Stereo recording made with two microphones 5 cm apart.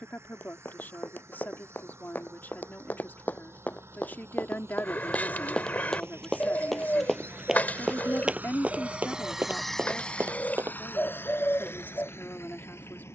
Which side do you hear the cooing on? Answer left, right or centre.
left.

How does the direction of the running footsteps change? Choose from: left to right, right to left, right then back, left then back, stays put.
left to right.